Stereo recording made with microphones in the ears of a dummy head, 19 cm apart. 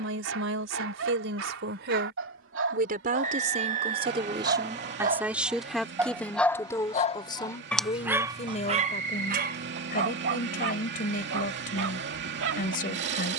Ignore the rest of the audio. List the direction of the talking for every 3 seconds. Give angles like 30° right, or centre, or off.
60° right, 20° right, 20° left, 40° left, 40° left.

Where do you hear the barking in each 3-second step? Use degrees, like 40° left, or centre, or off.
70° right, 50° right, centre, 50° right, 70° right.